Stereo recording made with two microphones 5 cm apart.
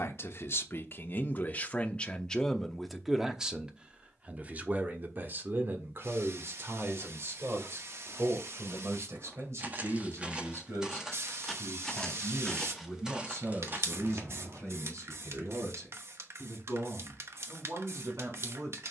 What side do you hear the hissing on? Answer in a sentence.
You can hear the hissing on the right.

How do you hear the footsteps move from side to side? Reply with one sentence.
You can hear the footsteps go left and come back.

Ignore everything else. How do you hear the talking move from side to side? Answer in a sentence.
In this clip you hear the talking move to the right.